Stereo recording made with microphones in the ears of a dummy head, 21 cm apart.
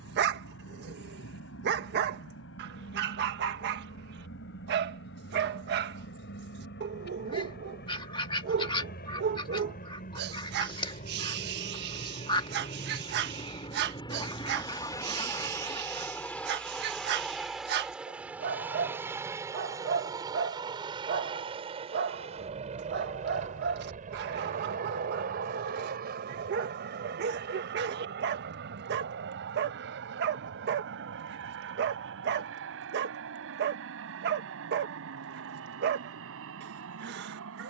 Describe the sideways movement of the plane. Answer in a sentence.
You can hear the plane move from left to right.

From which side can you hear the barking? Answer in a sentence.
You can hear the barking on the right.